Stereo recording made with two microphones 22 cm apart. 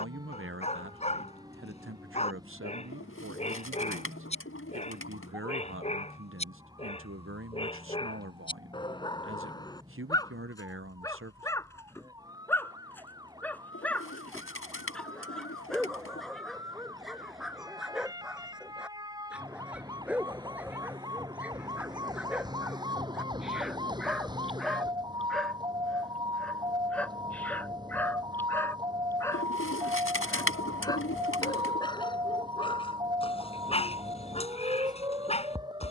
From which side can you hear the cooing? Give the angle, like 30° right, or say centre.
80° left.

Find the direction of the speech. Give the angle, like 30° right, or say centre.
70° right.